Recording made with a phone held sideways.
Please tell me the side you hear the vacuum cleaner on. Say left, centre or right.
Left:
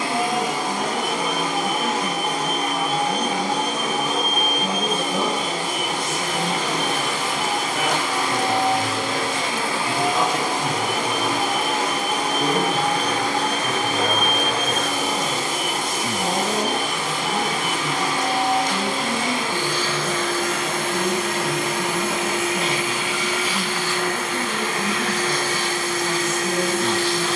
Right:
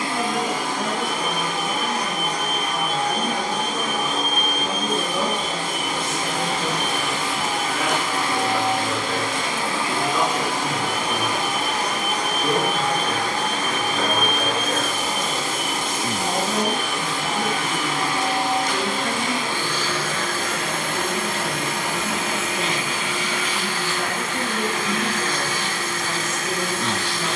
left.